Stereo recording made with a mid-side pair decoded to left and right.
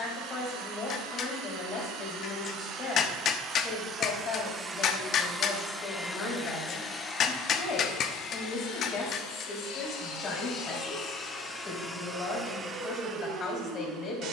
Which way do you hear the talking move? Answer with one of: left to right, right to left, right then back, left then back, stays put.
stays put.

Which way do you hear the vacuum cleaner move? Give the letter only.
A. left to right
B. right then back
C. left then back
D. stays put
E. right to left
C.